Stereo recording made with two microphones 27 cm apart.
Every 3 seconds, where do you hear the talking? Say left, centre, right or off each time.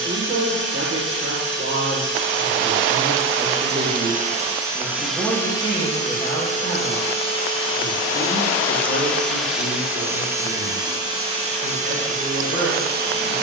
right, centre, left, left, left.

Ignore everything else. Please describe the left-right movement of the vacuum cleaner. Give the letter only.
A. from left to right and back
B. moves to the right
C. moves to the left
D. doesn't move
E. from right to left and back
E.